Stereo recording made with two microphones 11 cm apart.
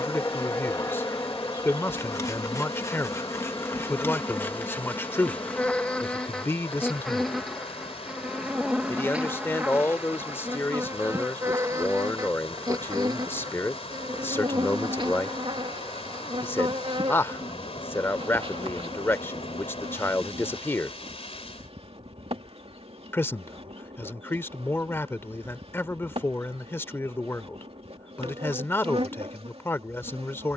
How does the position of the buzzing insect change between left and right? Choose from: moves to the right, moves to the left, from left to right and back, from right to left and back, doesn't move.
moves to the right.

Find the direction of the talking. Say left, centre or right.
left.